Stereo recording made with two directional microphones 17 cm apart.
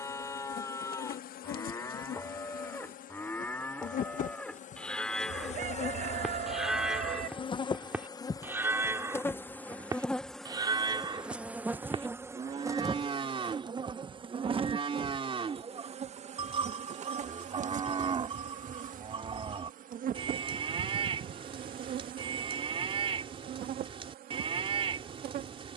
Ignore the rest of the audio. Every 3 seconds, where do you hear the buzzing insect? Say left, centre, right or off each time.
left, left, left, centre, right, right, right, right, right.